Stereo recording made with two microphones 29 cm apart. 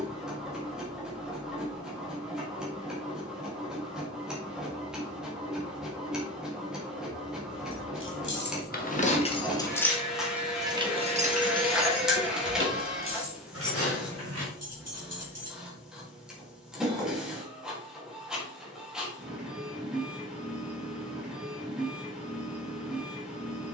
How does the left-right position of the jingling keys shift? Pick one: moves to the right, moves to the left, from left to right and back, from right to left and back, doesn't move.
moves to the right.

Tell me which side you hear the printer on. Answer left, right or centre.
centre.